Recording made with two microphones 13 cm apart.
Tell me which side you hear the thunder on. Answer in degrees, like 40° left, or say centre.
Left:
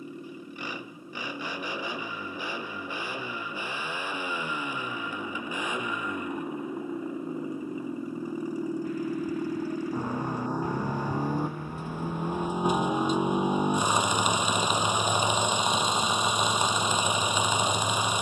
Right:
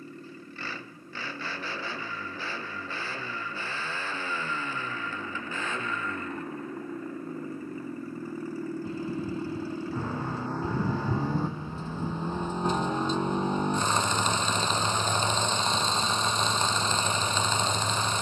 30° right.